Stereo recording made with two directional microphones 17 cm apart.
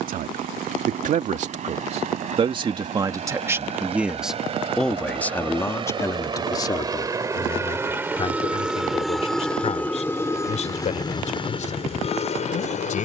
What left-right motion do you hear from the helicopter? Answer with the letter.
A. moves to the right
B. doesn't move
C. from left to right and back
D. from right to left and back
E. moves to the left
E.